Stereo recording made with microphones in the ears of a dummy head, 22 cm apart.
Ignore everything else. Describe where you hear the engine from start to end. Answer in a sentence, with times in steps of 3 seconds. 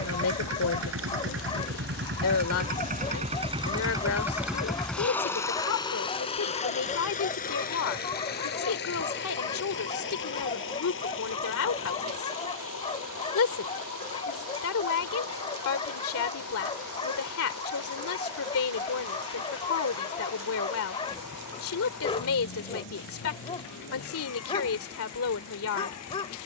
In this clip you hear the engine on the right from 0 s, in the centre from 3 s and on the left from 6 s.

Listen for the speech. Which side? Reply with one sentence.
You can hear the speech on the left.